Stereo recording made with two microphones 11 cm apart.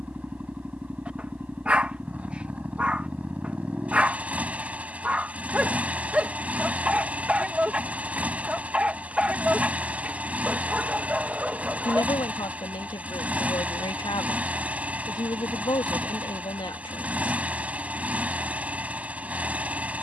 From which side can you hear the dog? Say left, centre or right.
centre.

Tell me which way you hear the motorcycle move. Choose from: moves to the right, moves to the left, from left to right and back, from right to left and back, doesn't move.
doesn't move.